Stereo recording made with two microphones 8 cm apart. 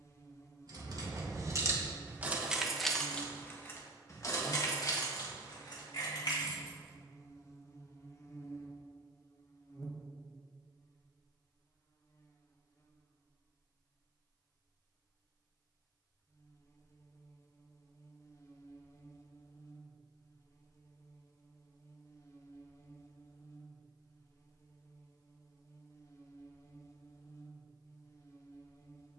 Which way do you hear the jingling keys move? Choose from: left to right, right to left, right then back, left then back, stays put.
right to left.